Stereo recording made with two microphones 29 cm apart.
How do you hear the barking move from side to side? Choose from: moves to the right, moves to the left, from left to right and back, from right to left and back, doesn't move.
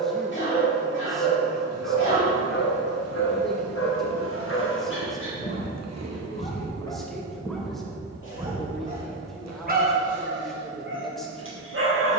moves to the right.